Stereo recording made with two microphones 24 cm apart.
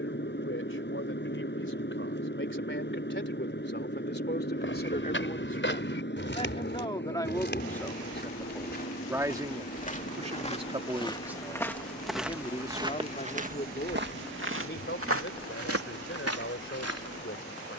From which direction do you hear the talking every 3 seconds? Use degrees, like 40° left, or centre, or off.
50° left, 40° left, 20° left, 10° right, 30° left, 50° left.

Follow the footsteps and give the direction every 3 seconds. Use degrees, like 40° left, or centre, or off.
off, 50° left, 40° left, 20° left, 30° right, 70° right.